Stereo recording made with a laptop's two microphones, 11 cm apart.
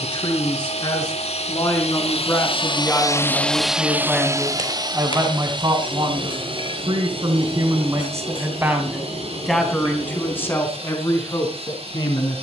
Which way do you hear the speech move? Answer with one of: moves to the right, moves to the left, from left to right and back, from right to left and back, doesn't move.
from left to right and back.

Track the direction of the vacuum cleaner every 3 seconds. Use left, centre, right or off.
left, right, right, right.